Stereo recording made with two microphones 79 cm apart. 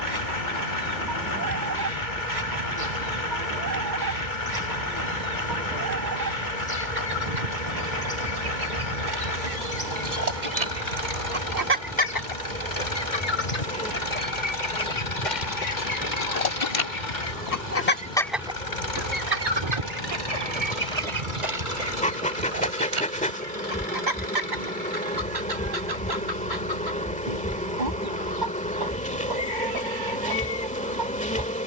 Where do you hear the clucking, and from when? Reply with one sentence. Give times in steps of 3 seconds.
In this clip you hear the clucking on the right from 0 s, on the left from 12 s and on the right from 18 s.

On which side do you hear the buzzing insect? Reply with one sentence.
You can hear the buzzing insect in the centre.